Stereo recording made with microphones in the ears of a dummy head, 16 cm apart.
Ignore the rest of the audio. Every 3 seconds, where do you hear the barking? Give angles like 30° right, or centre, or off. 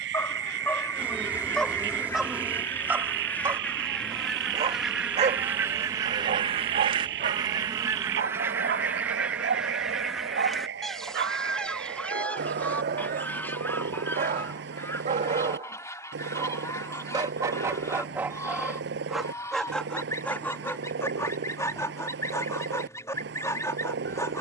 10° left, 30° right, 60° right, 70° right, 60° right, 30° right, centre, 20° left.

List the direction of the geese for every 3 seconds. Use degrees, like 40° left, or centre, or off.
20° left, centre, 20° right, centre, 10° left, 20° left, 20° left, 20° left.